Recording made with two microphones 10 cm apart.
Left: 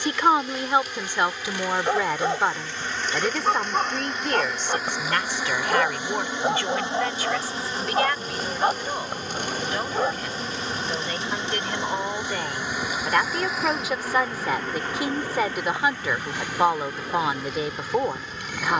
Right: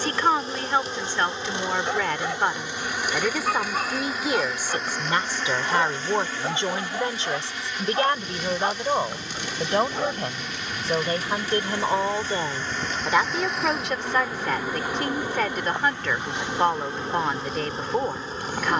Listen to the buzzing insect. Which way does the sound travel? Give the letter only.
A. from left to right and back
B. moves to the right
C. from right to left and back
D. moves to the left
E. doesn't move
C.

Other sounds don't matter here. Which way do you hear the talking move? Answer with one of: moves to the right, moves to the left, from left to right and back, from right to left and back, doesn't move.
from left to right and back.